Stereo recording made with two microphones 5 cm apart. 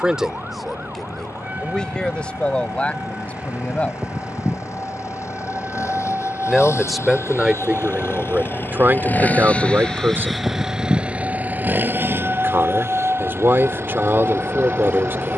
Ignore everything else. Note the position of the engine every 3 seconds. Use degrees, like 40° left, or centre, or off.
80° left, 80° left, 60° left, centre, 60° right.